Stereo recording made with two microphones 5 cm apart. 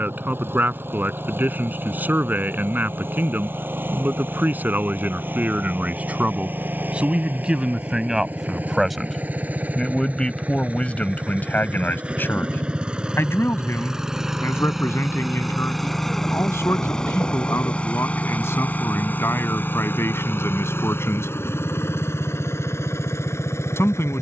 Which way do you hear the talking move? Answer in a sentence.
In this clip you hear the talking travel towards the left.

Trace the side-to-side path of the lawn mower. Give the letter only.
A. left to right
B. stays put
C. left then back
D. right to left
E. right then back
D.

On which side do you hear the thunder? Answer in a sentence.
In this clip you hear the thunder on the left.